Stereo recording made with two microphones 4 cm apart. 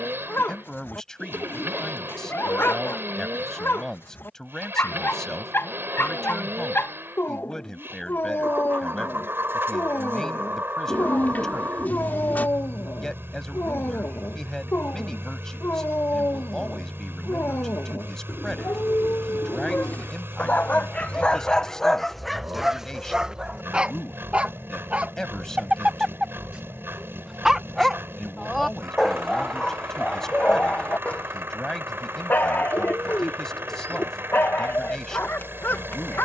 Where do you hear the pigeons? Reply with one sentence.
You can hear the pigeons on the left.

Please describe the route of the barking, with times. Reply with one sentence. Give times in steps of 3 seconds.
In this clip you hear the barking on the left from 0 s, in the centre from 21 s, on the right from 24 s, in the centre from 27 s and on the left from 30 s.